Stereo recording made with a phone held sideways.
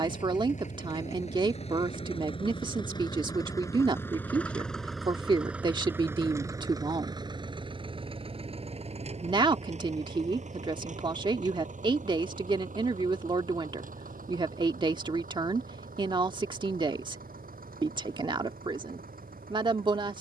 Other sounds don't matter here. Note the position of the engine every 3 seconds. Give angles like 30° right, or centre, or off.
40° left, 10° left, 30° right, 50° right, 60° right, 70° right, 70° right.